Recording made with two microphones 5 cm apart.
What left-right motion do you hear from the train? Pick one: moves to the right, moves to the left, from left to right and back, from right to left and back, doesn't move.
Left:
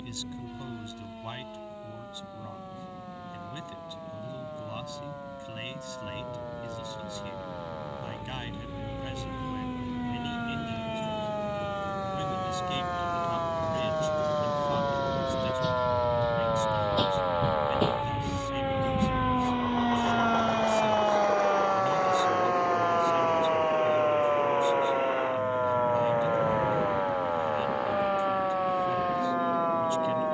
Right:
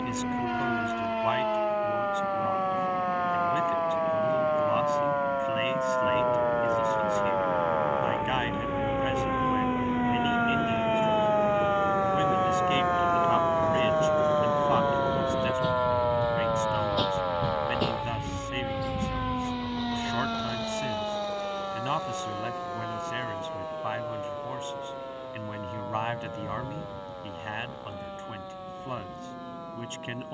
moves to the left.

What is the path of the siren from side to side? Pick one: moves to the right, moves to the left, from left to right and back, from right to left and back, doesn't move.
moves to the left.